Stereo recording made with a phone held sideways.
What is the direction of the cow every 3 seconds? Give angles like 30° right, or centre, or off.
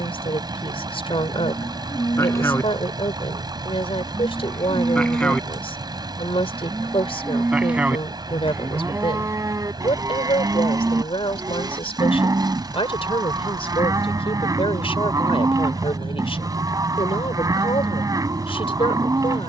20° left, 10° left, 10° right, 20° right, 20° right, 20° right, 20° right.